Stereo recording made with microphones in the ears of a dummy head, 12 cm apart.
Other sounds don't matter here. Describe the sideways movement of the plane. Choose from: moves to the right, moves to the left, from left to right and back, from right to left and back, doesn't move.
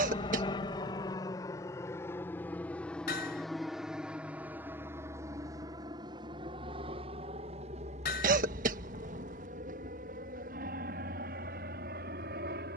moves to the right.